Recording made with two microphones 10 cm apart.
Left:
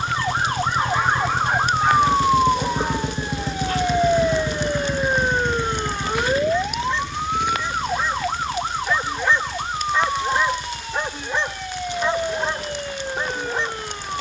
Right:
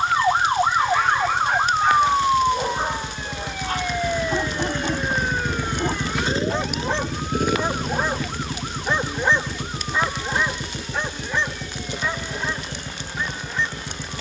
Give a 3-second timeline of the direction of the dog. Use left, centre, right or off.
centre, right, right, centre, left.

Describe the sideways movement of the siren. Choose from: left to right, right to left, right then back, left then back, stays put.
right to left.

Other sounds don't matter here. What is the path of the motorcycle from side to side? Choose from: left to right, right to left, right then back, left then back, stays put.
left to right.